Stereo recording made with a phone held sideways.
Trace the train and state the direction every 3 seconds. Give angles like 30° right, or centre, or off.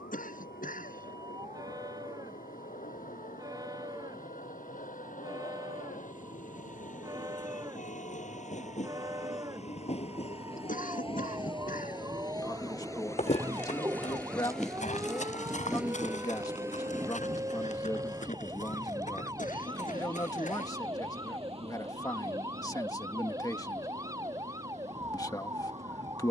80° left, 70° left, 60° left, 40° left, 20° left, 10° right, 30° right, 50° right, 50° right.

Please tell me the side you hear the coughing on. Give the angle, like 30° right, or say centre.
70° left.